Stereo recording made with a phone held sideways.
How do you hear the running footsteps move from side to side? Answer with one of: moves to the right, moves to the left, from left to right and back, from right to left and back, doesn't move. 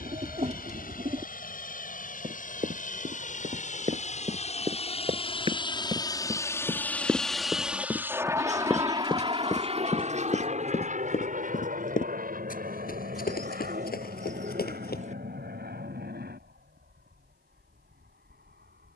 moves to the left.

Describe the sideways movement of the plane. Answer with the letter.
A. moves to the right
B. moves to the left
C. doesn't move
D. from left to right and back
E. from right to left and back
A.